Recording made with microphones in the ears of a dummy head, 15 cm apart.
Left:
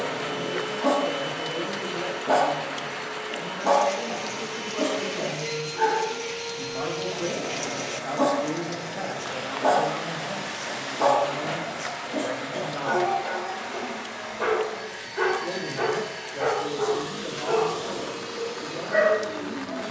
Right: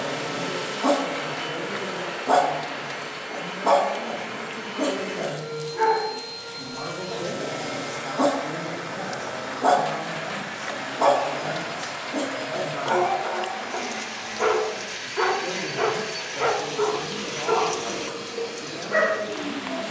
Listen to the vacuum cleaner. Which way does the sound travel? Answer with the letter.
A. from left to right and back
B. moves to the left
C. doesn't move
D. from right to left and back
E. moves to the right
C.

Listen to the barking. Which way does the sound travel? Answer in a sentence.
In this clip you hear the barking stay in one place.